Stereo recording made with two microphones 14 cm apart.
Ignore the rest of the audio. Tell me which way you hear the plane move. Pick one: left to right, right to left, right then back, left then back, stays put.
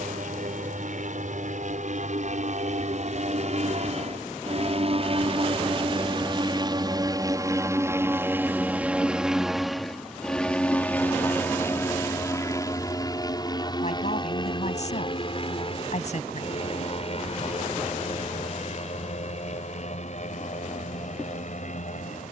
right to left.